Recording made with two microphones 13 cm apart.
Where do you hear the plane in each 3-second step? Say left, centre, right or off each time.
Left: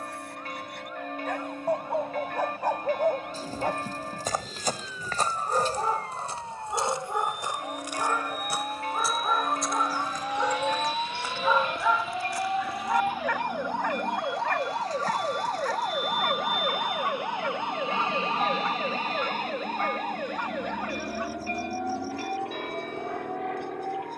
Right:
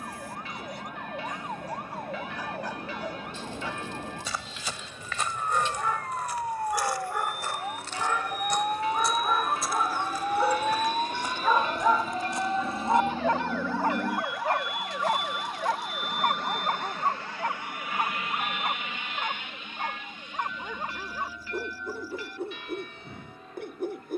right, right, right, right, right, centre, left, left.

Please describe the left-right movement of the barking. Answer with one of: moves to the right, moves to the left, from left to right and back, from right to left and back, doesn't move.
moves to the right.